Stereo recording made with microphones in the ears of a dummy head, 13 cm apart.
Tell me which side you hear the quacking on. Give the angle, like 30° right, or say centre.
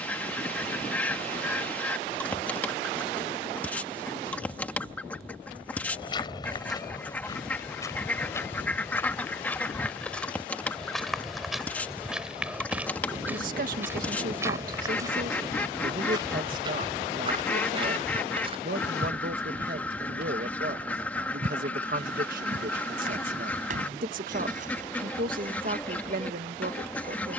10° left.